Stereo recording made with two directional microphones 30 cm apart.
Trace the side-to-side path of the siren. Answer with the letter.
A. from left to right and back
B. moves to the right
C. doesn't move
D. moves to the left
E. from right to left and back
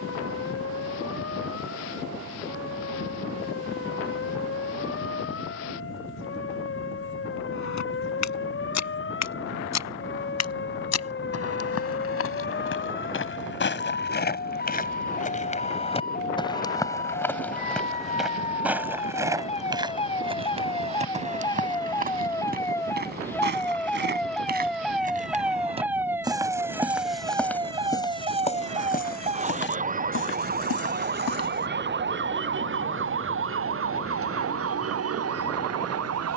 B.